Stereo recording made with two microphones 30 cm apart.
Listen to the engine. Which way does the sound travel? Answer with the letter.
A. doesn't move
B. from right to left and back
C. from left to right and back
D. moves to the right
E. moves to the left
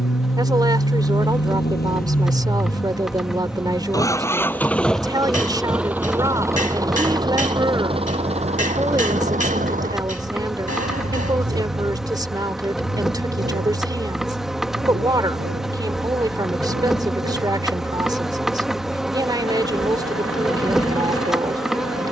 D.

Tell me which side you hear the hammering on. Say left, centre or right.
left.